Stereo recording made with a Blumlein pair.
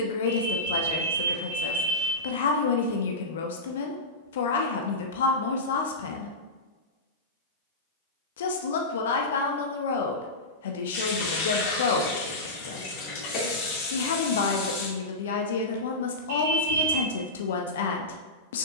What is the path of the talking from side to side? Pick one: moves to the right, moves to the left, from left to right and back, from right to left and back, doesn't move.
doesn't move.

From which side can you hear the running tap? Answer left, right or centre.
left.